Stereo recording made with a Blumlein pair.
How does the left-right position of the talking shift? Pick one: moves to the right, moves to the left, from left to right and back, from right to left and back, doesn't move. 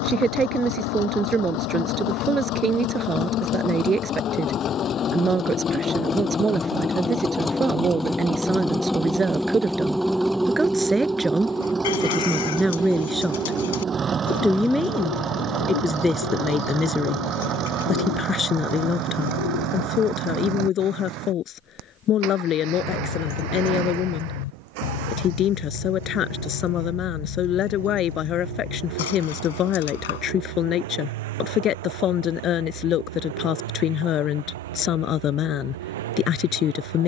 moves to the left.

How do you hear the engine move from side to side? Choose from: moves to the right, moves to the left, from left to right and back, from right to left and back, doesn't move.
moves to the right.